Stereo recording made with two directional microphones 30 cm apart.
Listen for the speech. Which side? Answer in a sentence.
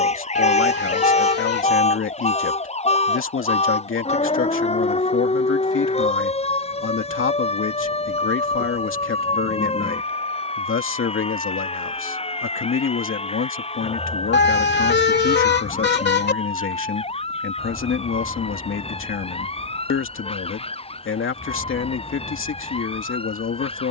In this clip you hear the speech on the left.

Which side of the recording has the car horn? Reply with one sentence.
In this clip you hear the car horn on the left.